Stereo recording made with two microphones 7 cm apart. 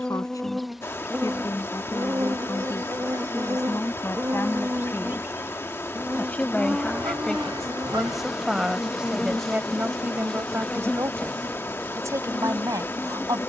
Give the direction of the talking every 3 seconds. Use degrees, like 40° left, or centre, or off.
50° left, 30° left, 10° left, 30° right, 50° right.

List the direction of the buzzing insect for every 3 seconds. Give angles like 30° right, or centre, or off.
20° right, 30° right, 10° right, 10° left, 20° left.